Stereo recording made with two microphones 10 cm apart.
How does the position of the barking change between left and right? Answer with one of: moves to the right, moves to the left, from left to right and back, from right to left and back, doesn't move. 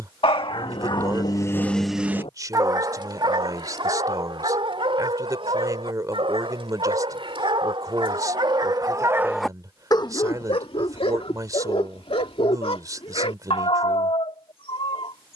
from left to right and back.